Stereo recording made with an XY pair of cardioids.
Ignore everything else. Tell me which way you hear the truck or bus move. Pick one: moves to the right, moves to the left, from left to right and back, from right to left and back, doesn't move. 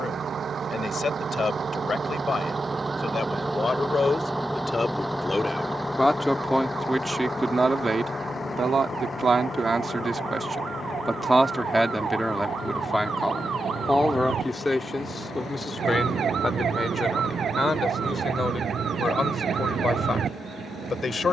moves to the left.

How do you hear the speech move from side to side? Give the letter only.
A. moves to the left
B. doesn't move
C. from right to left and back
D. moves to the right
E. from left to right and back
E.